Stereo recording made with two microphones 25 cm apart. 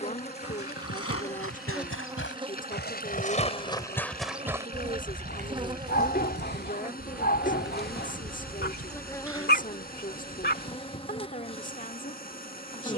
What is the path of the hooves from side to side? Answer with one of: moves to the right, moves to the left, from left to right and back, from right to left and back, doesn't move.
moves to the right.